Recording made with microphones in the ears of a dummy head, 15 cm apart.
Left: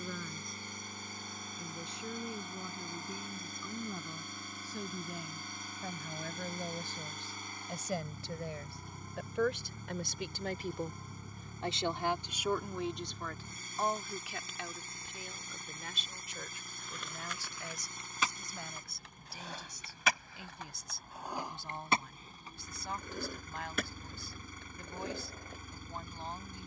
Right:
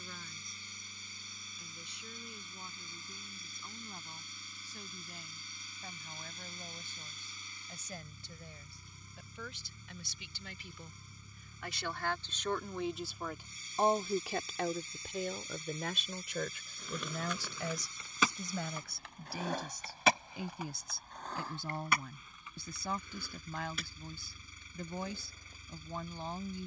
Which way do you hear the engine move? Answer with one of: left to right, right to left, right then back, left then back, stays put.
stays put.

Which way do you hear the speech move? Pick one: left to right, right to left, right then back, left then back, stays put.
left to right.